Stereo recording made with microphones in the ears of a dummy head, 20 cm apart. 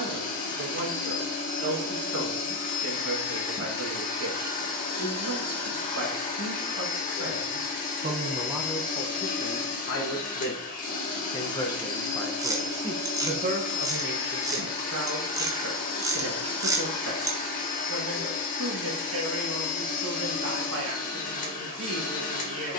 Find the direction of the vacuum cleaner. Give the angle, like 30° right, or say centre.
40° left.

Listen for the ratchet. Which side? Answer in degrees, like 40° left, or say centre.
20° right.